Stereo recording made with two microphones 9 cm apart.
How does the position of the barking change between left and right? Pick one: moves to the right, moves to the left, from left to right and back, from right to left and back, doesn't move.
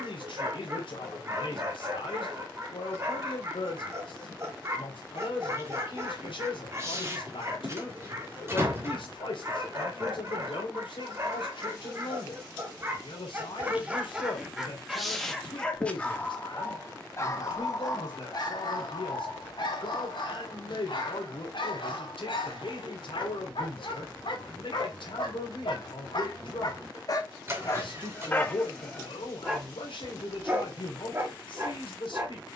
from right to left and back.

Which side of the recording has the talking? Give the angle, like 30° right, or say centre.
90° left.